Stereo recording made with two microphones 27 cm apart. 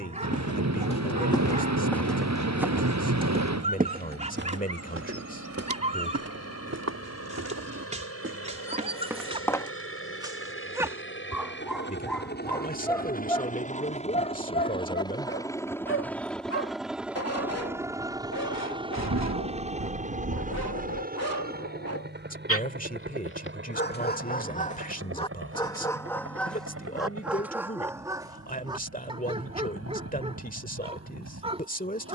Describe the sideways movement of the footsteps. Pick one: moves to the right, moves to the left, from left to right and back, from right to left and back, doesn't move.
from left to right and back.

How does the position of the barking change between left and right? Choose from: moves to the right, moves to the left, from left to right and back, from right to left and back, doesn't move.
from right to left and back.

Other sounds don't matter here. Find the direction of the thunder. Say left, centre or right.
right.